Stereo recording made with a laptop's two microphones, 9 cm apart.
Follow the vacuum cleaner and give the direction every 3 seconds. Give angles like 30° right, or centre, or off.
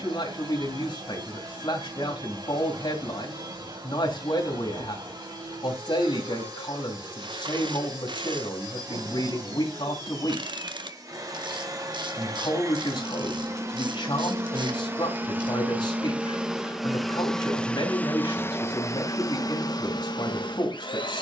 60° right, 60° right, 50° right, 50° right, 40° right, 10° right, 50° left.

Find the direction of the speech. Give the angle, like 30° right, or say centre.
60° left.